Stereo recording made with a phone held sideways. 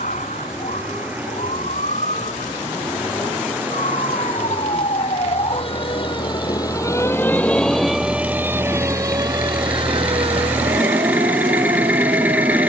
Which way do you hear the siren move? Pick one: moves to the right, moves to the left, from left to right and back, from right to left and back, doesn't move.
moves to the right.